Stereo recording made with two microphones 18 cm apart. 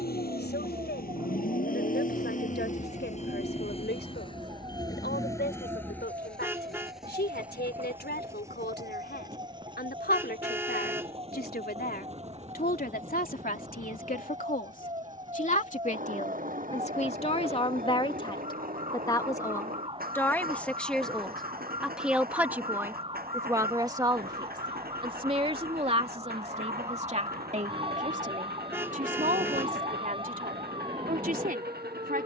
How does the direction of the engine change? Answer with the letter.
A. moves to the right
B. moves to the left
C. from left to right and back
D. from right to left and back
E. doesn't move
A.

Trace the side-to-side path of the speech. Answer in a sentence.
In this clip you hear the speech move to the right.